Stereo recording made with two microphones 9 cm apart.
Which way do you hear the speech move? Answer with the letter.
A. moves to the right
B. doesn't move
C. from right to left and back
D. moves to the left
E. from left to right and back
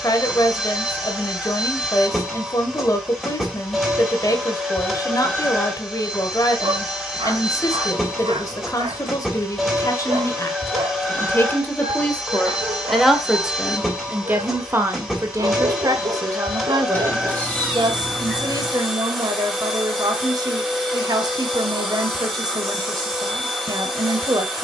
A.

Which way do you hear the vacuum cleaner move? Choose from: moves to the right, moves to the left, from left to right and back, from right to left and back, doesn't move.
doesn't move.